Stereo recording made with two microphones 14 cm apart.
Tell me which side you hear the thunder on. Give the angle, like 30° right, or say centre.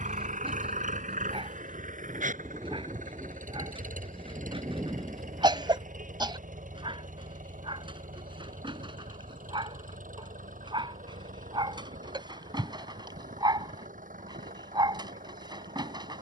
20° right.